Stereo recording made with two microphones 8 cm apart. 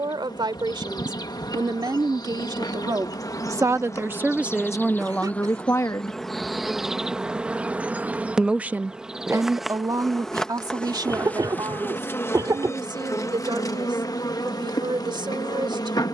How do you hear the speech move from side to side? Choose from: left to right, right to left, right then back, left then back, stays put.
left then back.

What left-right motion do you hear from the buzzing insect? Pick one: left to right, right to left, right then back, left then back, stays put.
right then back.